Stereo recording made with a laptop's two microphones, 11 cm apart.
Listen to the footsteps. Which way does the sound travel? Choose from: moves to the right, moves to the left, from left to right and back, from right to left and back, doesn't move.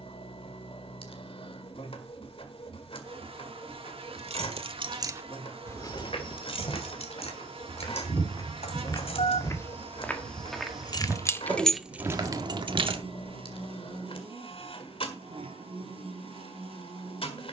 moves to the right.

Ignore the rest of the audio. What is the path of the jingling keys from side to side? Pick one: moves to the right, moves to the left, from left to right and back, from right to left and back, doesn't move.
from right to left and back.